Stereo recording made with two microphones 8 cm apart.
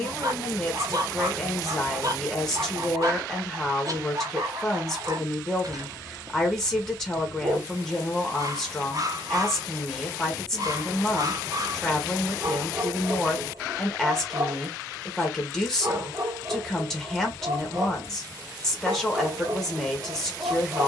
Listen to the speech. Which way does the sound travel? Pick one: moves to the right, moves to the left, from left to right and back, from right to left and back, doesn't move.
doesn't move.